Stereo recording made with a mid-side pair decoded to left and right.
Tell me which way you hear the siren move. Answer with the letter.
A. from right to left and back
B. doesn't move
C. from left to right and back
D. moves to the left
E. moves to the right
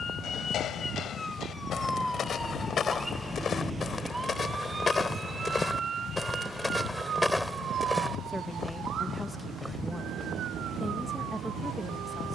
E.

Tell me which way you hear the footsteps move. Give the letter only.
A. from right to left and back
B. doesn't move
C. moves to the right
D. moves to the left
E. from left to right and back
C.